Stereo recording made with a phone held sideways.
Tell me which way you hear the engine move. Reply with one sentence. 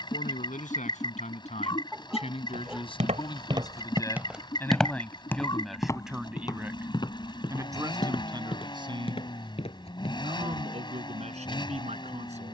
In this clip you hear the engine stay in one place.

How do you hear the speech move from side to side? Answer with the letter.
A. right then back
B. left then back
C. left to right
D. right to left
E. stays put
C.